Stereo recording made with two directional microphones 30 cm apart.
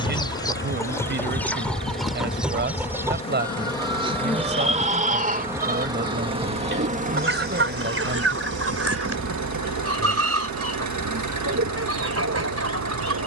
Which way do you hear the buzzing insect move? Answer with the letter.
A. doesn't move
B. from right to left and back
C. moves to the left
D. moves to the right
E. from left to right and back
D.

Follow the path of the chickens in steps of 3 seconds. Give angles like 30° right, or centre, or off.
centre, 20° right, 40° right, 50° right, 50° right.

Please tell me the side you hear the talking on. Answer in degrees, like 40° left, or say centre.
40° right.